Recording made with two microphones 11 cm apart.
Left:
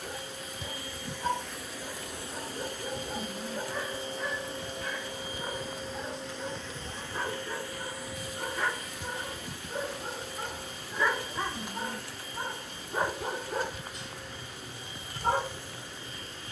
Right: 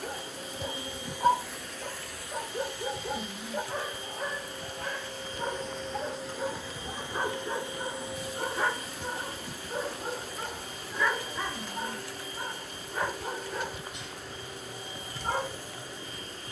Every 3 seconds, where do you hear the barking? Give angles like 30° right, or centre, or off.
50° right, 50° right, 30° right, centre, 30° left, 50° left.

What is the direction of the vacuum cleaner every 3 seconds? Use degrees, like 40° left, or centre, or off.
centre, 20° left, 20° right, 40° right, 40° right, 40° right.